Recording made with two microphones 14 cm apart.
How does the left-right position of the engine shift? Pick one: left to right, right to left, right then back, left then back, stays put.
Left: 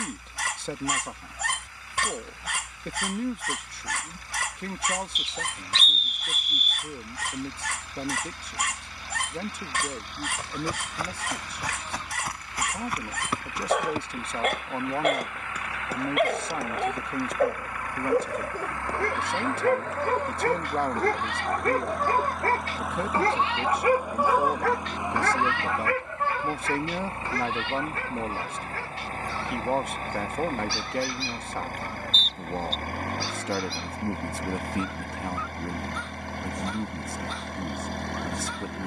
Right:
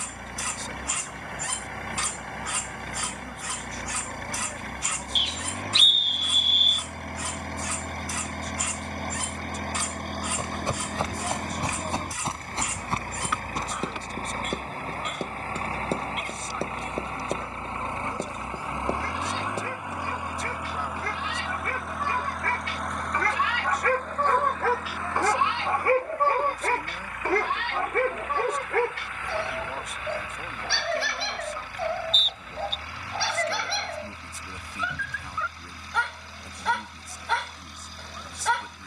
right to left.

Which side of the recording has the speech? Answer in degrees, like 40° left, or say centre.
70° left.